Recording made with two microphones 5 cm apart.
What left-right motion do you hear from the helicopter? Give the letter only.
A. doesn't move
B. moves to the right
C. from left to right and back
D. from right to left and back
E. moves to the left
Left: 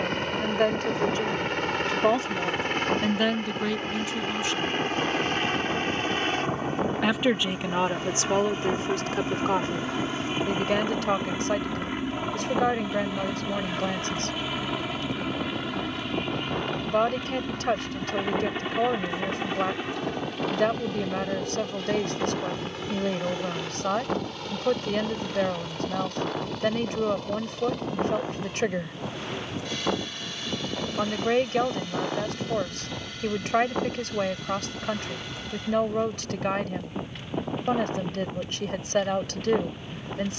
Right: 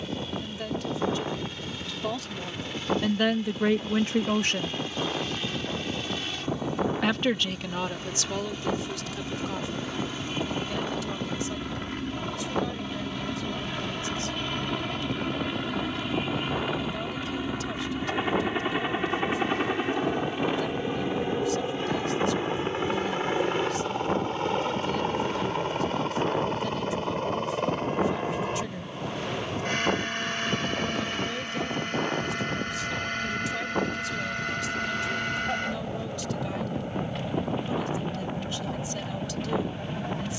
B.